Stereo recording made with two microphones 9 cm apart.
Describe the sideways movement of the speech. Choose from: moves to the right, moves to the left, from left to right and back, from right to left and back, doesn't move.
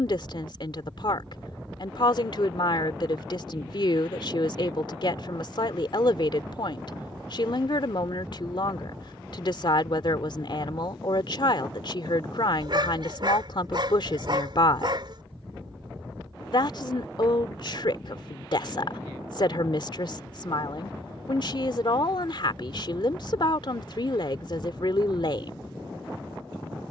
doesn't move.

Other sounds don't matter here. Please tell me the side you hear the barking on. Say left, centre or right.
right.